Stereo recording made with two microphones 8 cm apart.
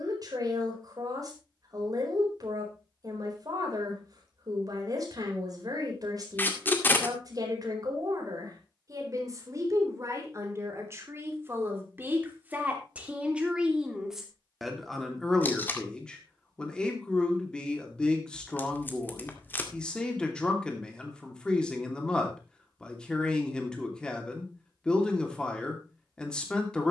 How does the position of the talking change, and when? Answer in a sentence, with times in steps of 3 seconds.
You can hear the talking on the right from 0 s and in the centre from 12 s.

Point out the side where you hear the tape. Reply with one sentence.
In this clip you hear the tape on the left.